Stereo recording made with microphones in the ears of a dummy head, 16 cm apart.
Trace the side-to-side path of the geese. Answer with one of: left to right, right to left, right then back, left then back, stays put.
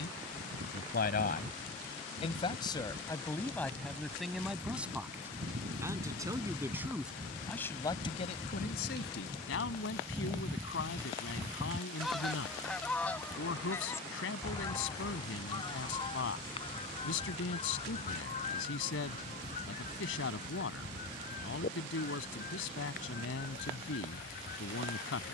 right to left.